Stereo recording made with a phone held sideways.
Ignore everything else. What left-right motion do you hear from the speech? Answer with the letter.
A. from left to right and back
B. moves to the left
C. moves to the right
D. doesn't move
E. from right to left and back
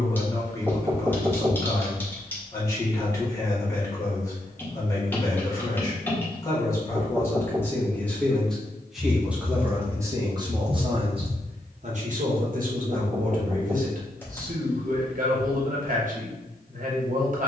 C.